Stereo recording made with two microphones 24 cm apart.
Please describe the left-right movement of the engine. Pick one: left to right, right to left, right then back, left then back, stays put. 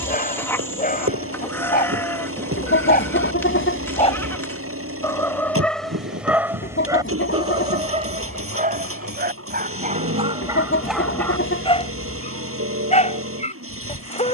stays put.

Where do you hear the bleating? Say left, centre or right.
centre.